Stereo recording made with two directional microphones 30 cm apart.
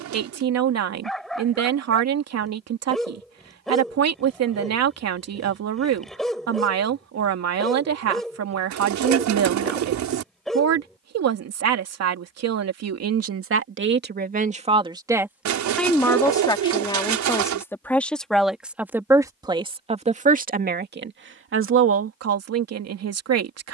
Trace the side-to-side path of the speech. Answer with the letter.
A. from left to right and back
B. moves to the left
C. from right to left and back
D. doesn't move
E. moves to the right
C.